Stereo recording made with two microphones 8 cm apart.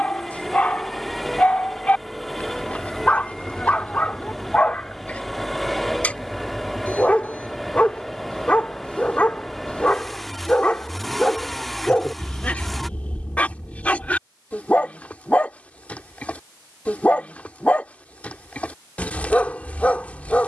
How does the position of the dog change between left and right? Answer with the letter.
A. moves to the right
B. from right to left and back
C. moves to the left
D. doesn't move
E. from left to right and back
D.